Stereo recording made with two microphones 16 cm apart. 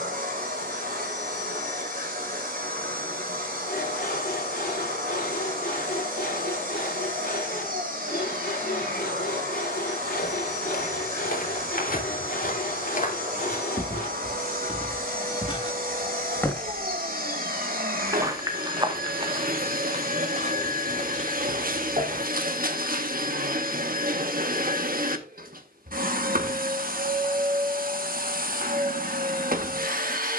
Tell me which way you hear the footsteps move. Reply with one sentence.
In this clip you hear the footsteps travel towards the right.